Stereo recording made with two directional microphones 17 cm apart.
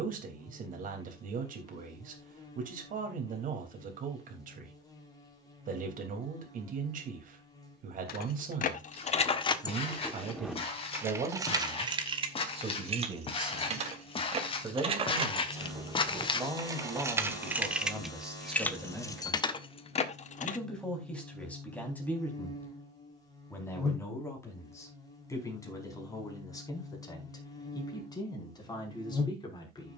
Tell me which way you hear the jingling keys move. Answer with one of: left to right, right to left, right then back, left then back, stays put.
right then back.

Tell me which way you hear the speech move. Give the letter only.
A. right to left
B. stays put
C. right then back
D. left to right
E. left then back
A.